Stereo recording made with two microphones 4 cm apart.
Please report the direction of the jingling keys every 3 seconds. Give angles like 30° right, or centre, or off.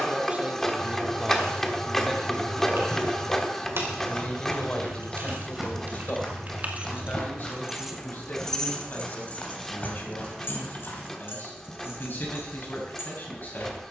70° right, 60° right, 20° right, 50° left, 70° left.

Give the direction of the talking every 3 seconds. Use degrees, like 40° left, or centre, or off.
10° right, 30° left, 50° left, 50° left, 50° left.